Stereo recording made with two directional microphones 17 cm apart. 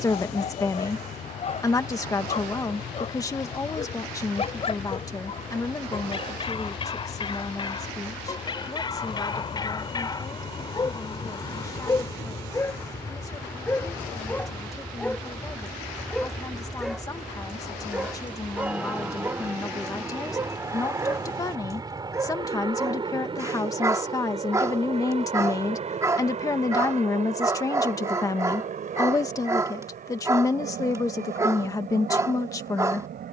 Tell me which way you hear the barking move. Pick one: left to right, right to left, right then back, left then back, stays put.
left to right.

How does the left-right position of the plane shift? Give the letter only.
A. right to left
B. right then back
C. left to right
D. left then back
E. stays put
C.